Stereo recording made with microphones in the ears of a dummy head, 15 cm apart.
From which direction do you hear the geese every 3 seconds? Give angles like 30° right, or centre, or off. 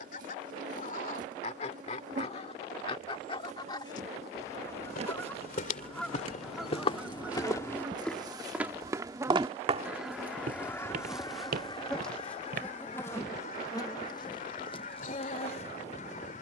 40° left, 20° left, 10° right, 10° left, 40° left, 50° left.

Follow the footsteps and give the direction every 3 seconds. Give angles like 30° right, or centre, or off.
off, 50° left, 20° left, 50° right, 70° right, off.